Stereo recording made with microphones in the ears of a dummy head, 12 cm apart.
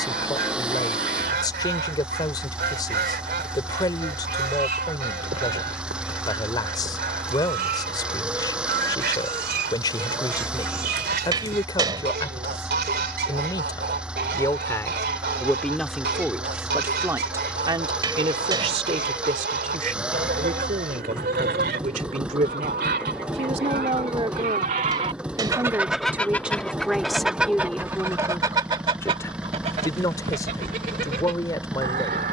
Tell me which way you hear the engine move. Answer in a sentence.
You can hear the engine stay put.